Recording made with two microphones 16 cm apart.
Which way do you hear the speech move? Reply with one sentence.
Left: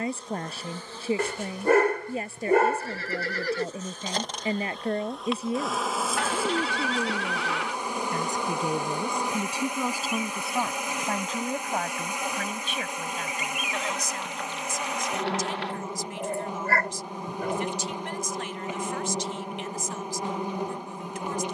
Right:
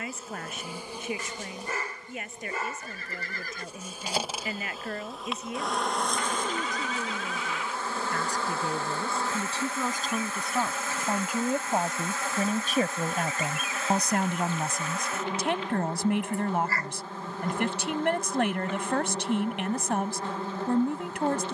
In this clip you hear the speech travel towards the right.